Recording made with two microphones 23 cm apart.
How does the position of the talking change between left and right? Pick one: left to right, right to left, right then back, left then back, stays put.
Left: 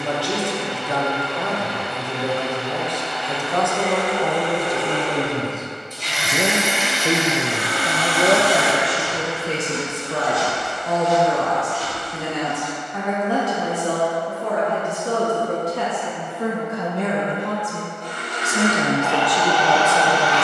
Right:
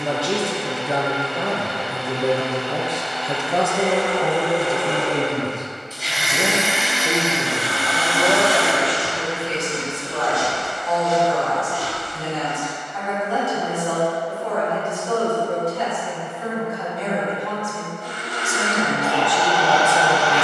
left then back.